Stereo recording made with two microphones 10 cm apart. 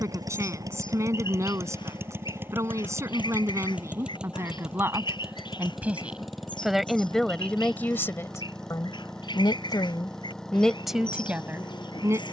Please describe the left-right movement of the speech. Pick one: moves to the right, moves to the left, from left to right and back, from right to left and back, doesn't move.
from right to left and back.